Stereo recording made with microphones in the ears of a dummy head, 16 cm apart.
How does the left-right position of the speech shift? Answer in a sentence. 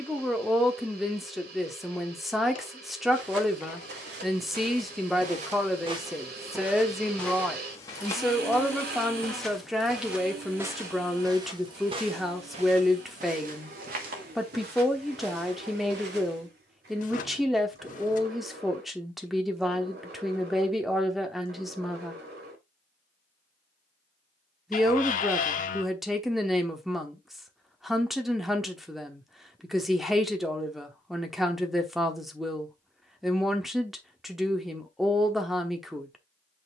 In this clip you hear the speech stay put.